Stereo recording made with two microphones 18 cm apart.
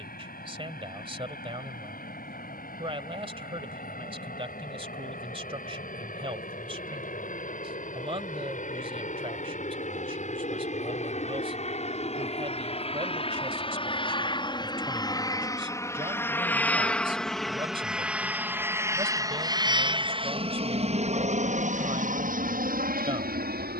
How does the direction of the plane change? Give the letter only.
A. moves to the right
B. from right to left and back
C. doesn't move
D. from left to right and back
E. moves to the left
A.